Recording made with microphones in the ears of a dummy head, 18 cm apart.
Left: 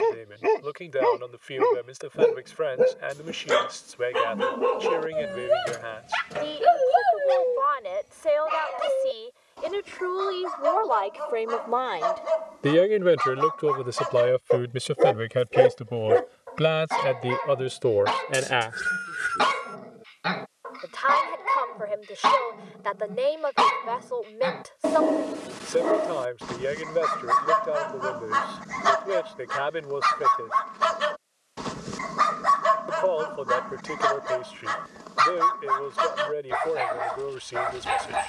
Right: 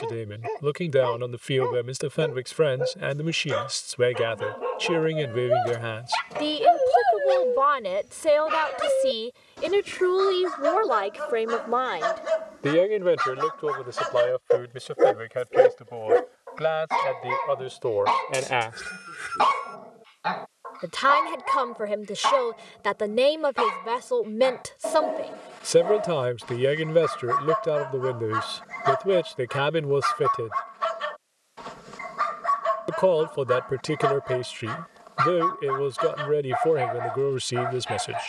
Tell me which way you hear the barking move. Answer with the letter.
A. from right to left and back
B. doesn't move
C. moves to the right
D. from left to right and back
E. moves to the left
D.